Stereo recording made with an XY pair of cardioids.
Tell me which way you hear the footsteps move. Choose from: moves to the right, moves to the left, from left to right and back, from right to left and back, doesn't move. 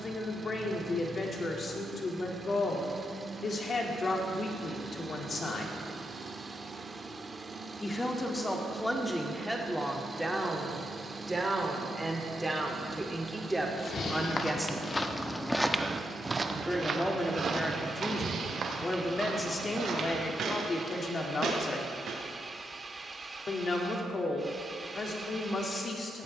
moves to the right.